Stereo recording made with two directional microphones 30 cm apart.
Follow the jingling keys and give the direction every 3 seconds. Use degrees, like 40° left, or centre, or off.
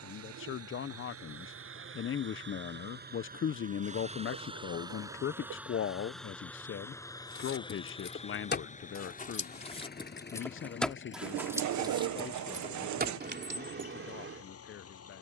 off, off, 40° left, 10° left, 40° right.